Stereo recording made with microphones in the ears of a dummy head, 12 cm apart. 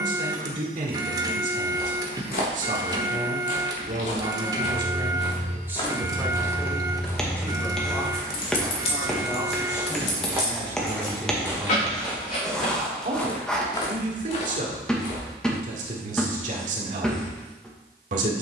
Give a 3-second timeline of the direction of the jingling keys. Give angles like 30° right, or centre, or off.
off, 70° right, 10° left, 50° left, 60° left, off.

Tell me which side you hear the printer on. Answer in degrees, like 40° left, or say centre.
30° right.